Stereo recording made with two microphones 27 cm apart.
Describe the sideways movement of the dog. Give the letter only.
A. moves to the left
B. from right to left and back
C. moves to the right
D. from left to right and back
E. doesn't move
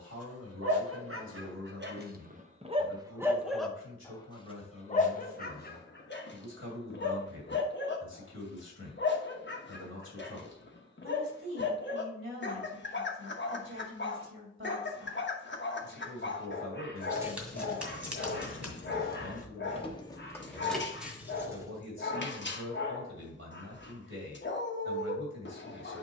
A.